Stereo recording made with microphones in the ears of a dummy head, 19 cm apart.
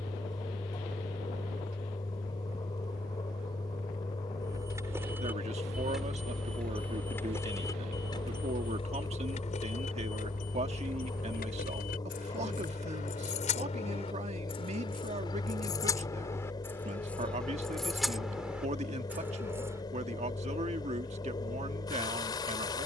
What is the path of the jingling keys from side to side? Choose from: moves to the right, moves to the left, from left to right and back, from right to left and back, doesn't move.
from right to left and back.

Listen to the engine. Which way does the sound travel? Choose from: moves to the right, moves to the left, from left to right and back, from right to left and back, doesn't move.
doesn't move.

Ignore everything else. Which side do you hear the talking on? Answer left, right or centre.
right.